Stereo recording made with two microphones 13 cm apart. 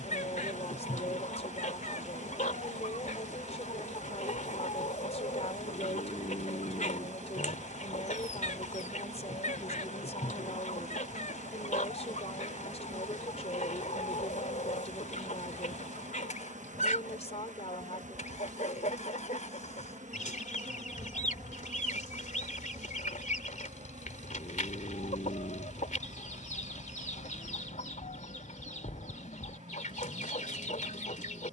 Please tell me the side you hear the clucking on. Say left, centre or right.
left.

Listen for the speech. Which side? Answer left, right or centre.
left.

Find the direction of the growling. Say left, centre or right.
left.